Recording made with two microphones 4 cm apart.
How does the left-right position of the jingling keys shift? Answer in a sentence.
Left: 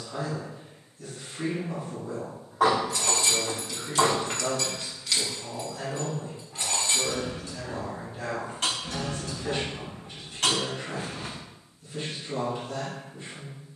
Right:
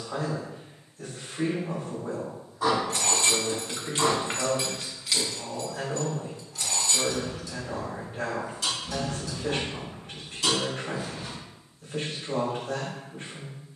In this clip you hear the jingling keys move to the left.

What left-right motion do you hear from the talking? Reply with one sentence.
In this clip you hear the talking stay put.